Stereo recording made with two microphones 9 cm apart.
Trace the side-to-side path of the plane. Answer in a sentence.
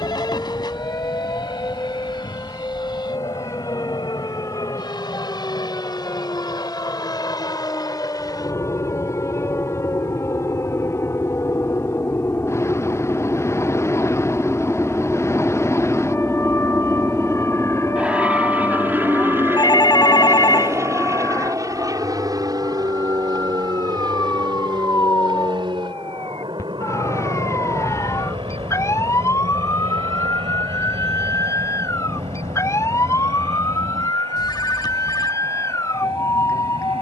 You can hear the plane move to the right.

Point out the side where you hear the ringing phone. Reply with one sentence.
In this clip you hear the ringing phone on the left.